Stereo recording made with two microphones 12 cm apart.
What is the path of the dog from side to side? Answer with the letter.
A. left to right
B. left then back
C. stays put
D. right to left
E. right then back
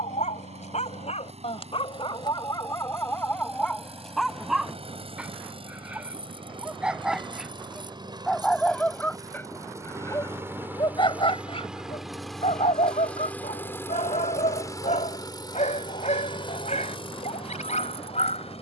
E.